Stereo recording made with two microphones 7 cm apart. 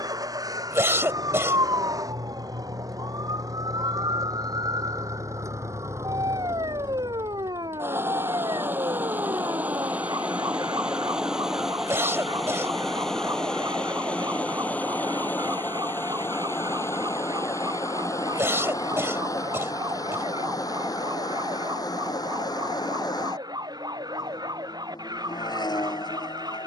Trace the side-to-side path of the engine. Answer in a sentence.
In this clip you hear the engine travel towards the left.